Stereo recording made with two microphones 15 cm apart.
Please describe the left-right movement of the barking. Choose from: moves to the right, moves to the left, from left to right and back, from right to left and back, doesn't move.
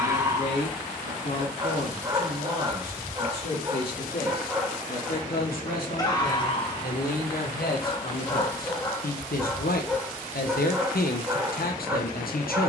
from right to left and back.